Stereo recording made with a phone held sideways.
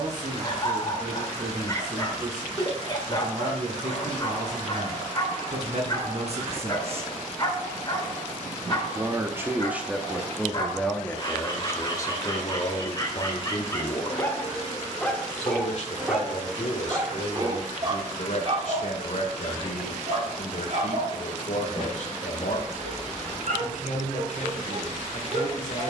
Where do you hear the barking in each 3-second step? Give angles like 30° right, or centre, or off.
30° left, 30° left, 30° left, 30° left, 20° left, 10° right, 50° right, 70° right, 80° right.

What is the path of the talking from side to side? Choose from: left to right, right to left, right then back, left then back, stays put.
right to left.